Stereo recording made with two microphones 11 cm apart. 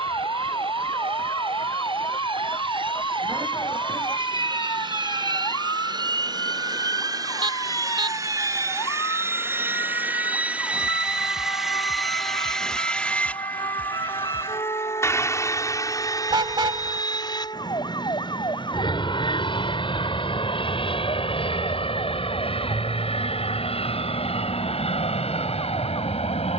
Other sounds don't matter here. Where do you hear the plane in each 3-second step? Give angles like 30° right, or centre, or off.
60° right, 50° right, 40° right, 10° right, 10° left, 30° left, 50° left, 50° left, 60° left.